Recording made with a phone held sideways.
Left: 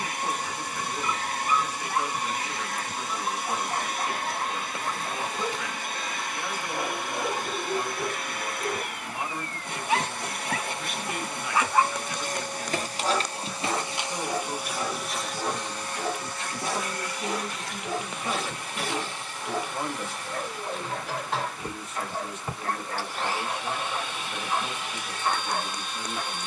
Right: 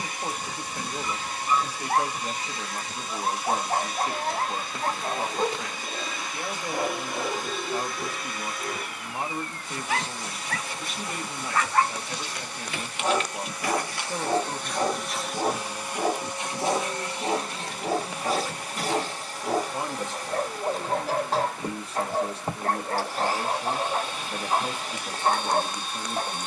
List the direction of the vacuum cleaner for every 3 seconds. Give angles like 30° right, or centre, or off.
50° left, 50° left, 50° left, 50° left, 30° left, 20° right, 30° right, 40° right, 40° right.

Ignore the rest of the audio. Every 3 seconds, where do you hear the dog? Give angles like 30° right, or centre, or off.
50° right, 50° right, centre, 10° left, 20° right, 40° right, 40° right, 40° right, 40° right.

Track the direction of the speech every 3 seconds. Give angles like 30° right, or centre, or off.
30° right, 30° right, 30° right, 30° right, 30° right, centre, 10° right, 30° right, 30° right.